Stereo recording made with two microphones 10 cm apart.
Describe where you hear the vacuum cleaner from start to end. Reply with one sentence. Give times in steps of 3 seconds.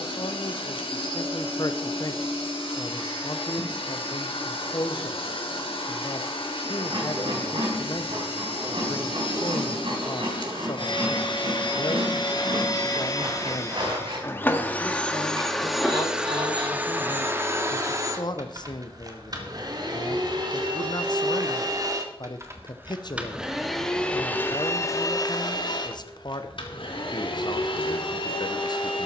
In this clip you hear the vacuum cleaner on the left from 0 s, in the centre from 15 s, on the right from 18 s and on the left from 24 s.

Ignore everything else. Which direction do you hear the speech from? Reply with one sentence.
In this clip you hear the speech on the left.